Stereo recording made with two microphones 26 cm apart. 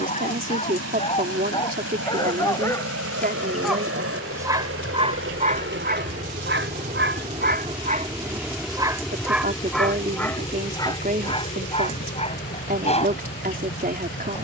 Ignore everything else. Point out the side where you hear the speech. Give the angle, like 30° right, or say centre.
30° right.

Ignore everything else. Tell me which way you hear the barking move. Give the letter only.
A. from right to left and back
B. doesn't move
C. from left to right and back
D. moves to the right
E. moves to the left
C.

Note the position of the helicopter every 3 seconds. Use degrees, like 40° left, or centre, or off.
70° right, 60° right, 20° right, 20° left, 40° left.